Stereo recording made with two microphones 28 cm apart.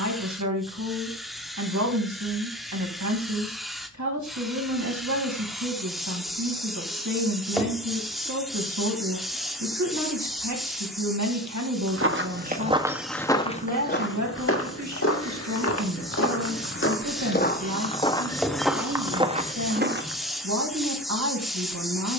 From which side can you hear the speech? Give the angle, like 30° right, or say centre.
70° right.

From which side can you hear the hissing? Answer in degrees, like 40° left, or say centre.
centre.